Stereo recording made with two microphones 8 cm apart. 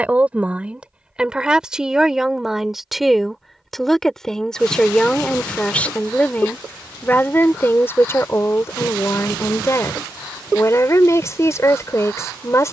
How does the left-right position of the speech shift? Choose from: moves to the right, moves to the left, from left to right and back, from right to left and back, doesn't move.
moves to the left.